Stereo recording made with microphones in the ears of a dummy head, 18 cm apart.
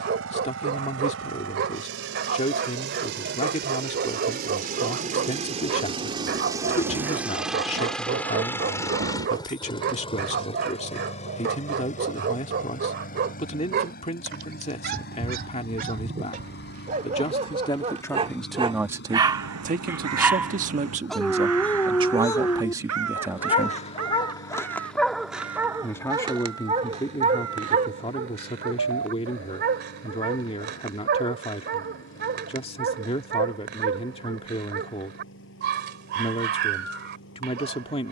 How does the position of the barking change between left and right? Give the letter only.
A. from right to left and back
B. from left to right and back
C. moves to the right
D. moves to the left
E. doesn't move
A.